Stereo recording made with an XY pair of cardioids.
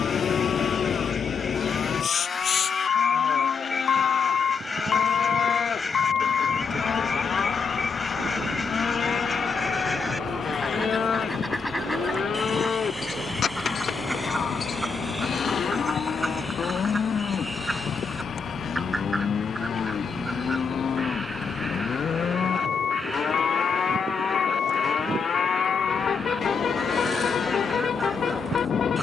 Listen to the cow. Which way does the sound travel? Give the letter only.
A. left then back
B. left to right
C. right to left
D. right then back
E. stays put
E.